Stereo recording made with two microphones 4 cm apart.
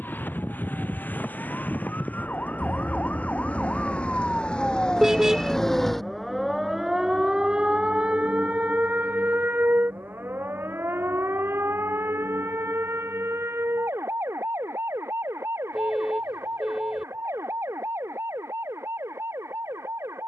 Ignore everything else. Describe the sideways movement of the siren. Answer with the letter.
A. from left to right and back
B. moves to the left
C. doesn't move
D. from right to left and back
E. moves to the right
E.